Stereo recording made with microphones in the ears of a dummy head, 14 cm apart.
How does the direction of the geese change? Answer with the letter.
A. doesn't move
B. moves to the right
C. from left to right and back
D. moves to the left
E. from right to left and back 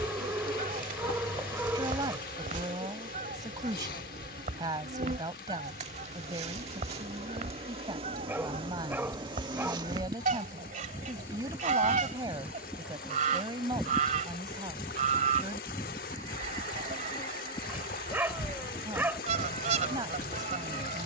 A.